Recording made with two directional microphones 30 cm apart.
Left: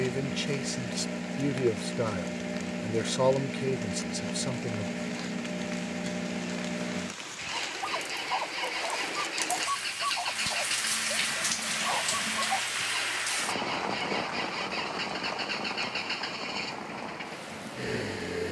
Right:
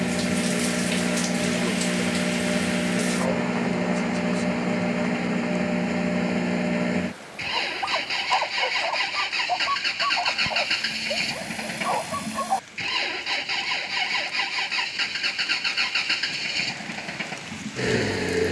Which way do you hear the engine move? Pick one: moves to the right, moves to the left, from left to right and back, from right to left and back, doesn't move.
doesn't move.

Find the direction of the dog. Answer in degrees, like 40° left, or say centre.
50° right.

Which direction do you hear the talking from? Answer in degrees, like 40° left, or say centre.
50° left.